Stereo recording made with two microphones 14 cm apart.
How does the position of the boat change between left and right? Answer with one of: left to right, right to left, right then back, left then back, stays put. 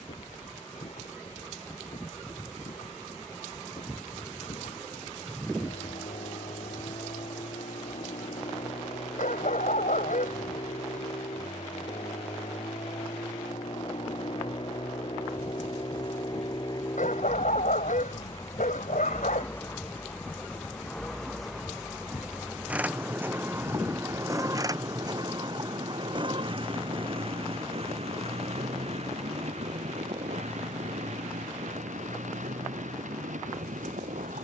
left to right.